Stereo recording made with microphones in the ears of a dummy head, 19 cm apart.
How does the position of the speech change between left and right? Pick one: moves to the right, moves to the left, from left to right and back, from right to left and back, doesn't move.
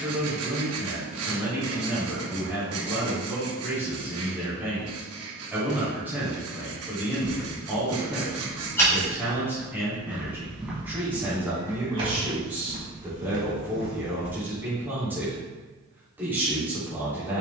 doesn't move.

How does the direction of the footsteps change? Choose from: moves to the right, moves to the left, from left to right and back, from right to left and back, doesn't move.
moves to the right.